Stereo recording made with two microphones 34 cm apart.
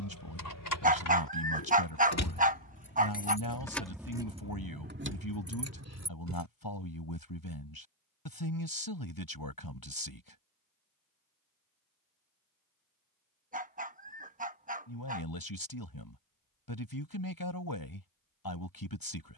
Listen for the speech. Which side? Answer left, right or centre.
left.